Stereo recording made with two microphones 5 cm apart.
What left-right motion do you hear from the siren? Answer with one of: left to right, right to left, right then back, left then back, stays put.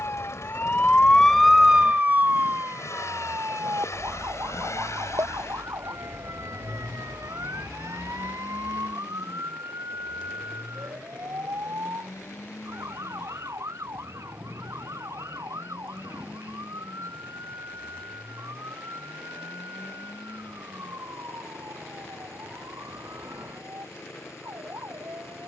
left to right.